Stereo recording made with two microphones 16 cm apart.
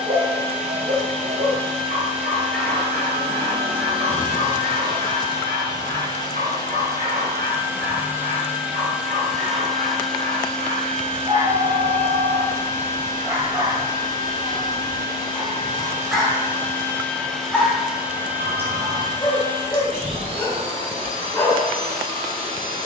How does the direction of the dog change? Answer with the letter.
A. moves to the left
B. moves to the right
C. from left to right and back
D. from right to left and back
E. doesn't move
A.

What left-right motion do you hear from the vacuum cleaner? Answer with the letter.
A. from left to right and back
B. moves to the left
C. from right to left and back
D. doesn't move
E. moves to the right
C.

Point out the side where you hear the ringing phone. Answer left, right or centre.
right.